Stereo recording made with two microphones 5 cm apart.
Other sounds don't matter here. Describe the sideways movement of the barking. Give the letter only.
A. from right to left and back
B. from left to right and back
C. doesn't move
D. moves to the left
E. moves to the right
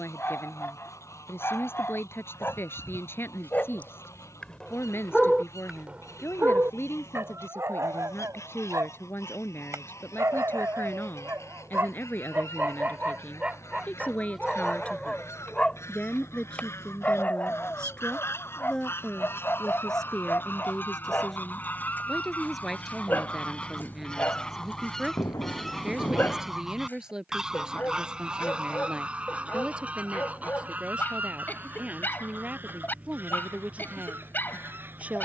B.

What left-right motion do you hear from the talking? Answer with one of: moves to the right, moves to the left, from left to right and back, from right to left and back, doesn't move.
moves to the right.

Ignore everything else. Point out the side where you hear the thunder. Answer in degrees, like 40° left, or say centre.
80° left.